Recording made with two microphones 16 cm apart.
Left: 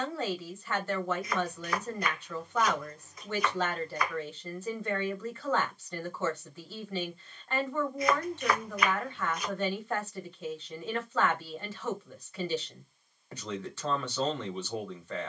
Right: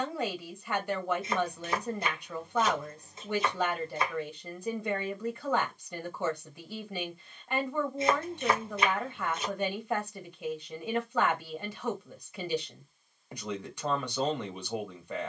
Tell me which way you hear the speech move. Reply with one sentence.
In this clip you hear the speech stay put.